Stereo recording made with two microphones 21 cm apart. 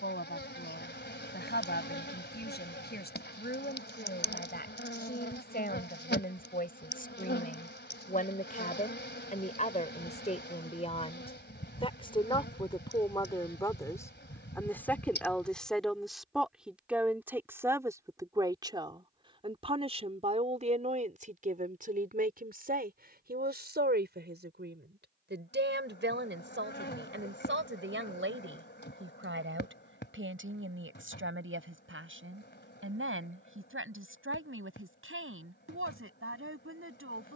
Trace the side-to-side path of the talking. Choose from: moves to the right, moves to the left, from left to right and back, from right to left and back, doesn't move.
moves to the right.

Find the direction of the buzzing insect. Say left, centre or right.
left.